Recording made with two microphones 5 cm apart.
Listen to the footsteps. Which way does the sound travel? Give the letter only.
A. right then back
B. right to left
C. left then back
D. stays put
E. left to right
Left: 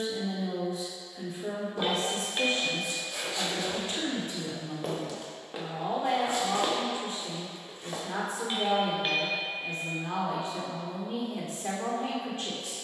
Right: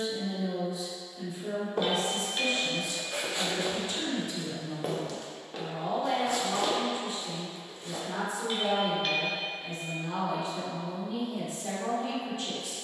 B.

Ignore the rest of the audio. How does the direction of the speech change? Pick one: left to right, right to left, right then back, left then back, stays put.
stays put.